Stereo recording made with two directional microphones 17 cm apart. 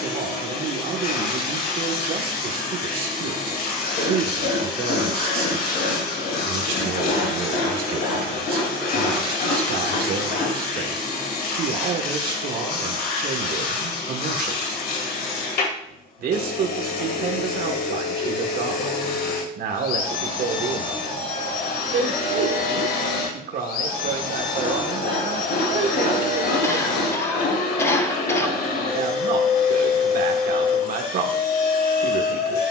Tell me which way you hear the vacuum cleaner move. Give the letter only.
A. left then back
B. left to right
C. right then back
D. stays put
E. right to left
D.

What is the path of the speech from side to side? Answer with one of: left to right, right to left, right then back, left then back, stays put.
stays put.